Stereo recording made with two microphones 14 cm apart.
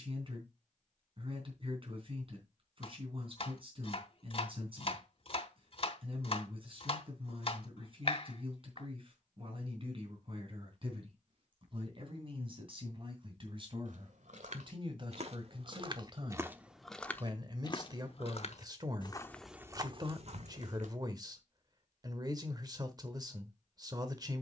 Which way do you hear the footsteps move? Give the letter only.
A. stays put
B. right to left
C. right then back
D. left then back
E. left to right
D.